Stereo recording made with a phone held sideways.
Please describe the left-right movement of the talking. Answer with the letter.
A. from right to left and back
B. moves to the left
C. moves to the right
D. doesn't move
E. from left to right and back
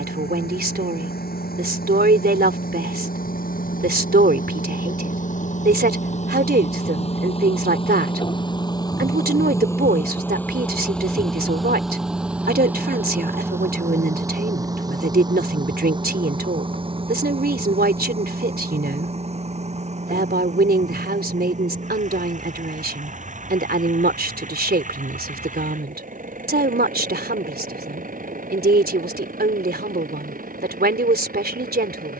D.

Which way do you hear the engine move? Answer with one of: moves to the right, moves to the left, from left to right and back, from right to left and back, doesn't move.
moves to the right.